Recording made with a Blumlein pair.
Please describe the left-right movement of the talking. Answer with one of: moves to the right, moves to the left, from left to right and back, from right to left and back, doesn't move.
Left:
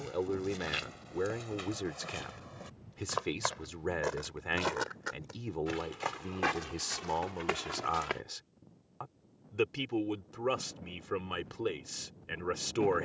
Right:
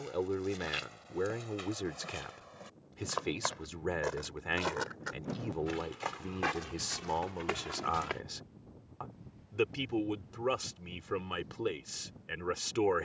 doesn't move.